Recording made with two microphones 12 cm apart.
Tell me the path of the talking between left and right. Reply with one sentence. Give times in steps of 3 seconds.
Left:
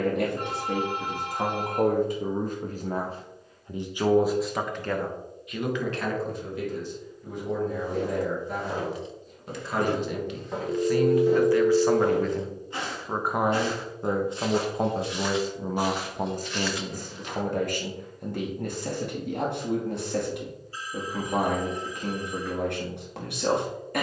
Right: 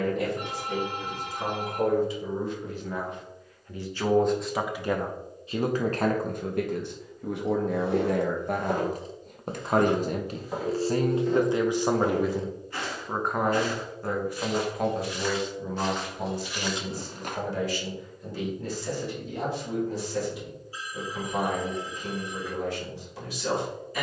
In this clip you hear the talking on the left from 0 s, in the centre from 3 s, on the right from 6 s, in the centre from 12 s and on the left from 15 s.